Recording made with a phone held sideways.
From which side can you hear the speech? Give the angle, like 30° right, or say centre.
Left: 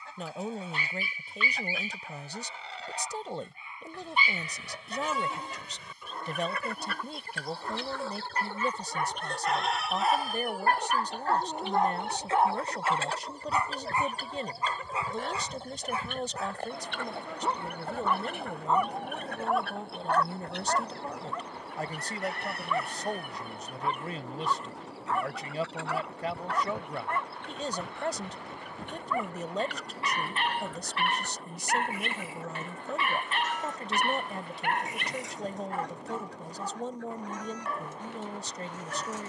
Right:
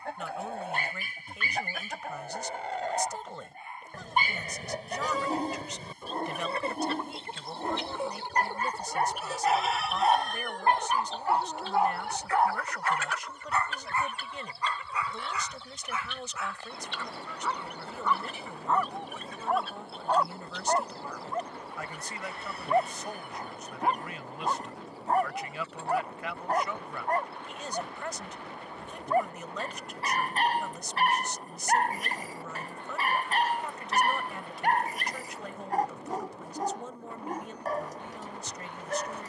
30° left.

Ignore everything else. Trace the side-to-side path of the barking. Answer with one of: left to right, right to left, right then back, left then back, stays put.
left then back.